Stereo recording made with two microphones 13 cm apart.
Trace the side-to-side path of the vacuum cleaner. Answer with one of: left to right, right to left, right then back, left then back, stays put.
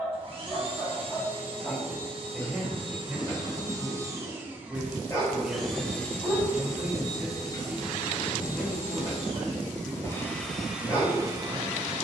left then back.